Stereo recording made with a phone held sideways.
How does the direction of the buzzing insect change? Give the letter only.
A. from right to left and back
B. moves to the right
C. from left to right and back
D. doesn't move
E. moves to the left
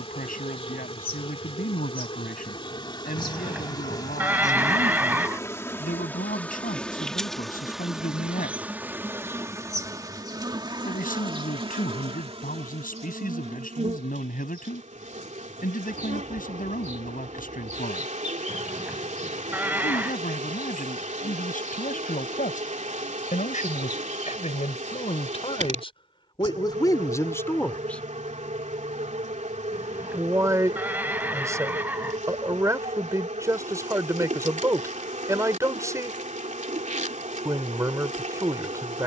B.